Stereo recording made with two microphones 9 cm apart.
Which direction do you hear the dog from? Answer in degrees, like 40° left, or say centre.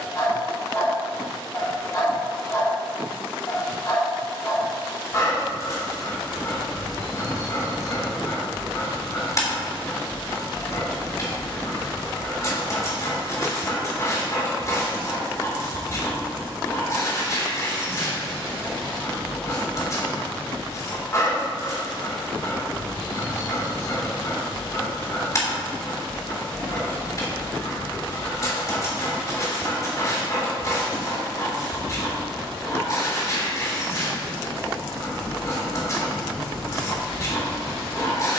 40° left.